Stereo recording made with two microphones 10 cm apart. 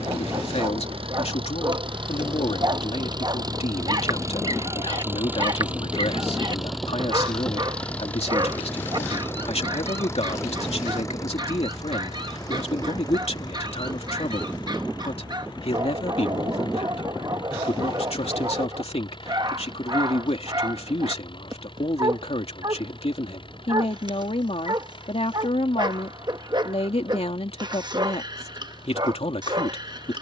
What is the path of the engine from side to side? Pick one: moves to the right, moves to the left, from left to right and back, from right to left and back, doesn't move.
moves to the left.